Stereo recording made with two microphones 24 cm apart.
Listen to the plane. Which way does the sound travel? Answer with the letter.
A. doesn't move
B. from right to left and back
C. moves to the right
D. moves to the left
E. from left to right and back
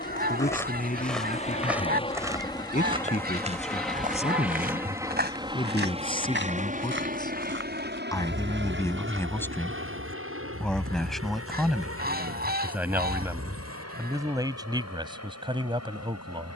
C.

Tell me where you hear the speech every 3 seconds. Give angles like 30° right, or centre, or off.
30° left, 30° left, 20° left, centre, 10° right, 20° right.